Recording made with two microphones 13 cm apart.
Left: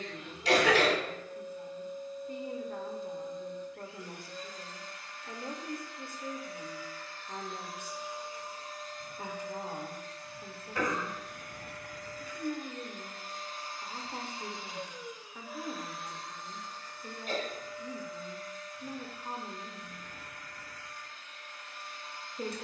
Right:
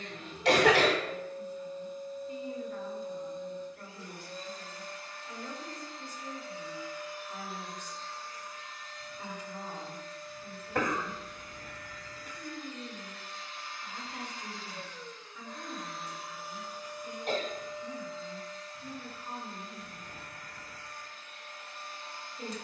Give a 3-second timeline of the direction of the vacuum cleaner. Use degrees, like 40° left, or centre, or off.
30° right, 30° right, centre, 60° left, 40° left, 10° right, 30° right, 30° right.